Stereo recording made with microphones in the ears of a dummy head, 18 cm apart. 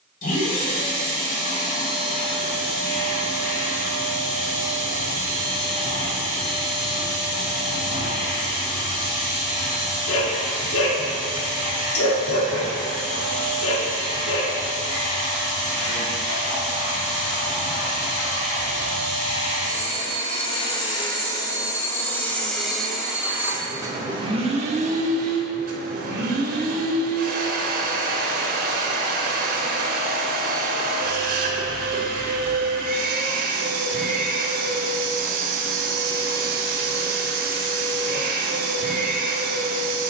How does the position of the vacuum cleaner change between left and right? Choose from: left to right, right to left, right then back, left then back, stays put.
left to right.